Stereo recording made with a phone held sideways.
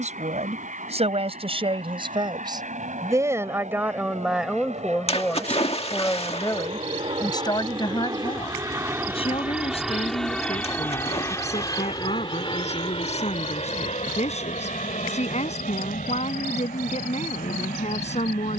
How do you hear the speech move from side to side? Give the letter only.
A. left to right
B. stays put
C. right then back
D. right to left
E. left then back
D.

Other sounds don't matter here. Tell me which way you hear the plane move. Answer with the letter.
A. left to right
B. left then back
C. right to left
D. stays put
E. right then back
C.